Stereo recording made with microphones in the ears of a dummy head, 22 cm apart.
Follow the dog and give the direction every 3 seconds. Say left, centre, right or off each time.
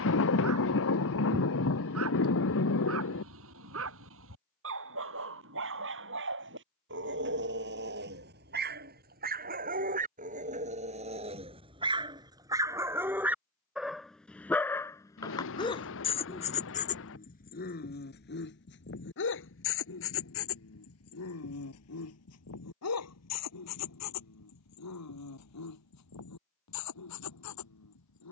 right, right, right, right, centre, left, left, left, left, left.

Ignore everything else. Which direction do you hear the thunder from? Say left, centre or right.
left.